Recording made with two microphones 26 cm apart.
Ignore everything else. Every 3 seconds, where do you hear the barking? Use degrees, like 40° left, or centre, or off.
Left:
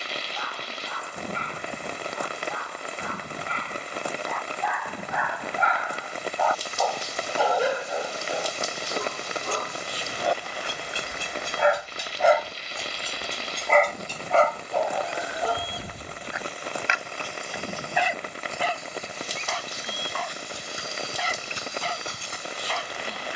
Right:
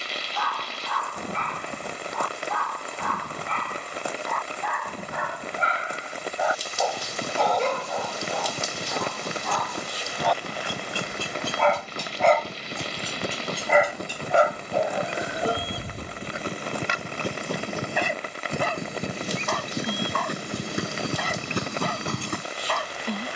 70° right, 50° right, 10° left, 20° left, 10° right, 30° right, 60° right, 60° right.